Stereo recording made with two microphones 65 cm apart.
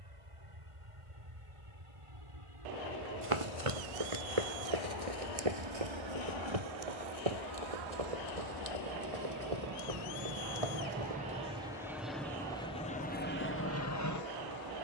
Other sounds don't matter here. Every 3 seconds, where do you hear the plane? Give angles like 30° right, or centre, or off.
60° right, 50° right, 40° right, 20° right, 20° left.